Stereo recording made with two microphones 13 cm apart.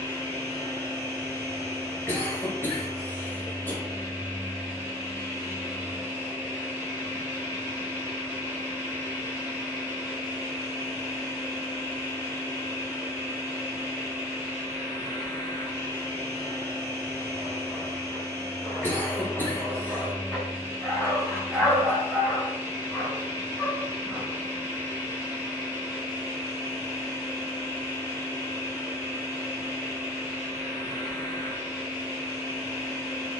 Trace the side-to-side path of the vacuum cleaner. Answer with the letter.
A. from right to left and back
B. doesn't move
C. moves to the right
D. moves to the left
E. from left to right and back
B.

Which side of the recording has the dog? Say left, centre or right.
centre.